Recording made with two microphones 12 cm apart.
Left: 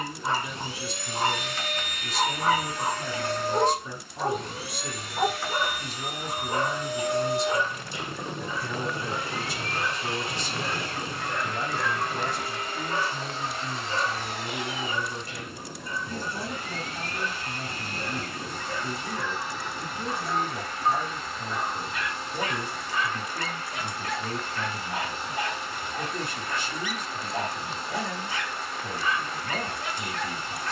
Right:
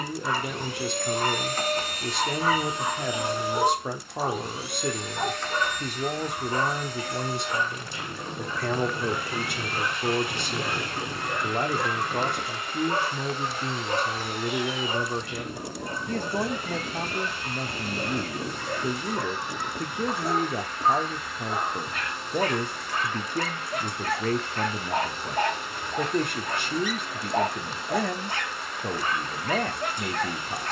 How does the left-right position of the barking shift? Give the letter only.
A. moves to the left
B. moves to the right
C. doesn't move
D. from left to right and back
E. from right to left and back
B.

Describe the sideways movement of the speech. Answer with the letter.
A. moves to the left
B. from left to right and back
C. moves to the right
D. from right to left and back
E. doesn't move
E.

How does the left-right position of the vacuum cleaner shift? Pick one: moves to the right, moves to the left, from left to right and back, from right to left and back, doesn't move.
moves to the left.